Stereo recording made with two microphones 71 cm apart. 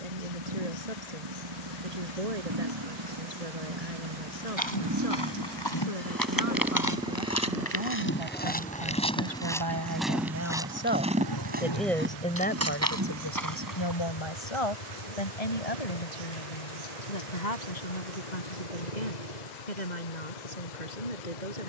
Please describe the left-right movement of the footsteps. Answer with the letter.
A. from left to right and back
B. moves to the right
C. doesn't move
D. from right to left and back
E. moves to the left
B.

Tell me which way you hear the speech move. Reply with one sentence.
You can hear the speech move from right to left.